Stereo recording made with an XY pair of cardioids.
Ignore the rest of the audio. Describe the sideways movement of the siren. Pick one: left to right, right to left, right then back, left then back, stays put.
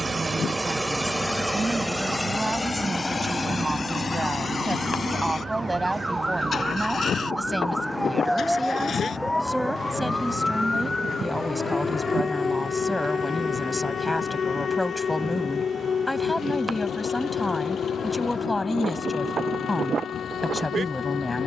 right to left.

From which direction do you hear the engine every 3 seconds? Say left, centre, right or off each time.
centre, left, left, left, left, left, left.